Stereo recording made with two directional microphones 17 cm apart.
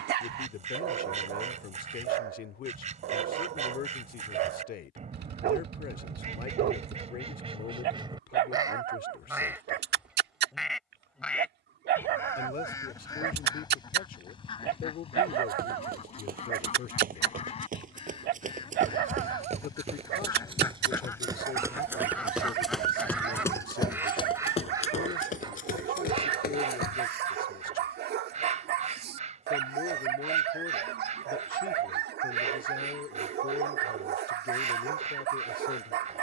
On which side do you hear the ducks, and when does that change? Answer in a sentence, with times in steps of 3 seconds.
You can hear the ducks on the right from 0 s, in the centre from 9 s, on the left from 12 s, in the centre from 21 s and on the right from 24 s.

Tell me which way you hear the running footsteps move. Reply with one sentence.
In this clip you hear the running footsteps travel towards the left.